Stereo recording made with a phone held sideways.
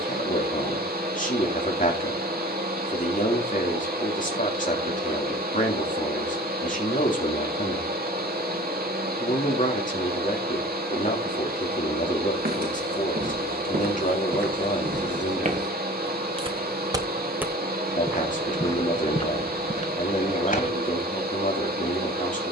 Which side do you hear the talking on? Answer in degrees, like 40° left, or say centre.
50° left.